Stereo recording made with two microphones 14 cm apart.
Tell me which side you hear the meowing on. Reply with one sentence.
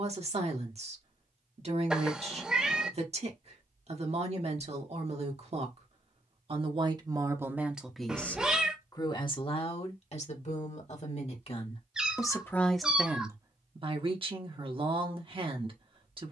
In this clip you hear the meowing in the centre.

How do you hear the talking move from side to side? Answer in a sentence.
You can hear the talking move from right to left and back again.